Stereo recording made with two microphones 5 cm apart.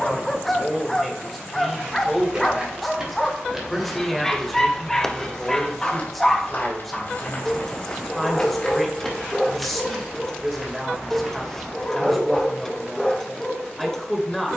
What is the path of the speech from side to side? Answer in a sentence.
In this clip you hear the speech stay put.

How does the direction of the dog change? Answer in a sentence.
You can hear the dog stay put.